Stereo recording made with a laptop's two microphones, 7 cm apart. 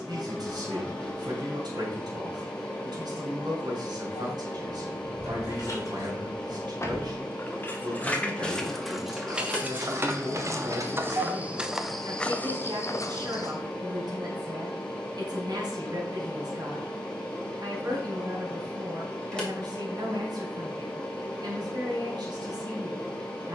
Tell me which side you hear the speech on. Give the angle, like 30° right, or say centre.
70° right.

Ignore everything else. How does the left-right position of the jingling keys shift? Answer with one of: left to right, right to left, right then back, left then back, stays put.
left to right.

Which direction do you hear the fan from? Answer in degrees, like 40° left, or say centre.
10° left.